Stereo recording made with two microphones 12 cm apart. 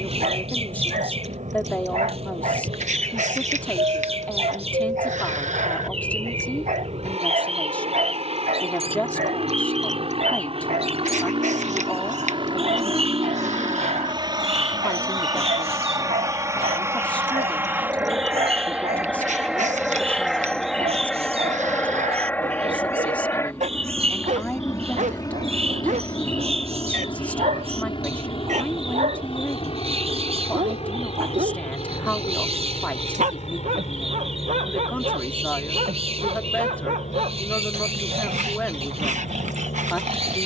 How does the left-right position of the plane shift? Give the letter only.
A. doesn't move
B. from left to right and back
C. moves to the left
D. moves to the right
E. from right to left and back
C.